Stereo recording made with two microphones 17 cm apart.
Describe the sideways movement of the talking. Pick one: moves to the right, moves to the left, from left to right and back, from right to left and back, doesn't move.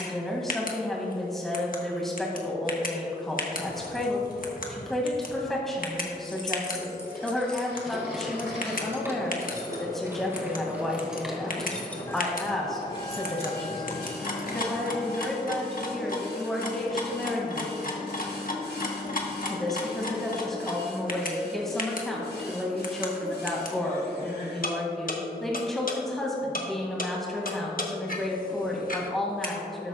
doesn't move.